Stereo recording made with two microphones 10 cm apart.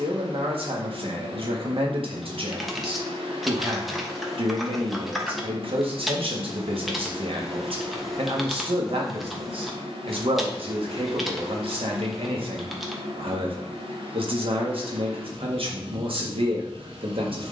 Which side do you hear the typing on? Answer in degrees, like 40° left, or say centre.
centre.